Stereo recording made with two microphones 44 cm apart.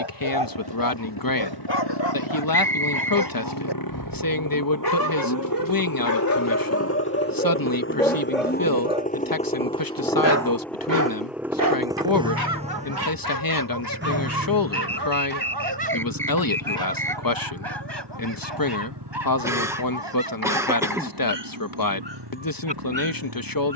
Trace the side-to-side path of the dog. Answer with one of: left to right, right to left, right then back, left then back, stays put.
left to right.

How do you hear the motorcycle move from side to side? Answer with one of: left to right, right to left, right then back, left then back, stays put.
left to right.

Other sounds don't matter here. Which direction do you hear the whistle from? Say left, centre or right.
centre.